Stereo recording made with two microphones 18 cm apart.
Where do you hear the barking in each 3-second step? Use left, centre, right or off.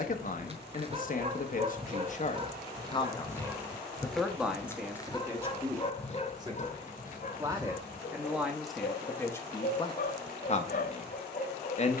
right, centre, left, left.